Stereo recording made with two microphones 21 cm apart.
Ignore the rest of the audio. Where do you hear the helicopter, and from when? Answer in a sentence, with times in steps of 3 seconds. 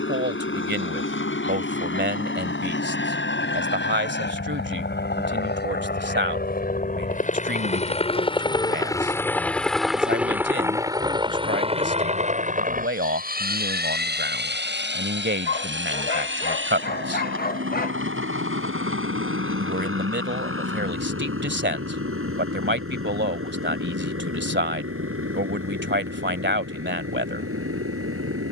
In this clip you hear the helicopter on the left from 0 s, in the centre from 9 s and on the right from 12 s.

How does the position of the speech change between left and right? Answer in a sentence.
You can hear the speech stay put.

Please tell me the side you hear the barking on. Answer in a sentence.
In this clip you hear the barking on the left.